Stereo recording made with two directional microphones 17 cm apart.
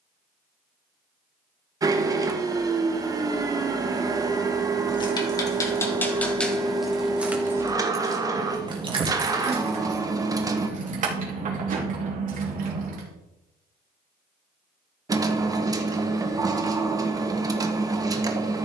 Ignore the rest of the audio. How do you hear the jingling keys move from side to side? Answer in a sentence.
You can hear the jingling keys travel towards the right.